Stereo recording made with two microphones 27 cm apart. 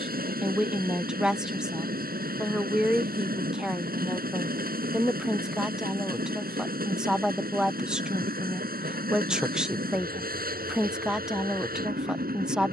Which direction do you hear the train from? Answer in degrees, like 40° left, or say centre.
30° right.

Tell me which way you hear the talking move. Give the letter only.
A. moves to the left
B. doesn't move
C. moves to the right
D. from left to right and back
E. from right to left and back
B.